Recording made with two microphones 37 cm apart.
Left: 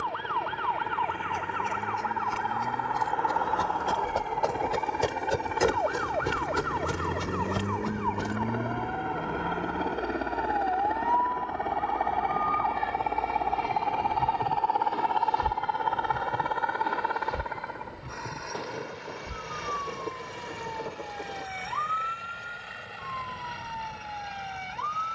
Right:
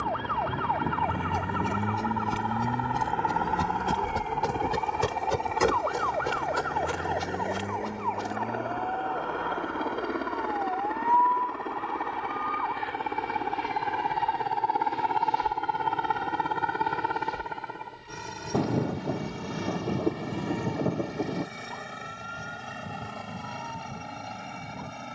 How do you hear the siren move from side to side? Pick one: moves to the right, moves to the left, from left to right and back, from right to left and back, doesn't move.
moves to the left.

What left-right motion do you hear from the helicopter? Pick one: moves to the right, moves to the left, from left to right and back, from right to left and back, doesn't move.
moves to the right.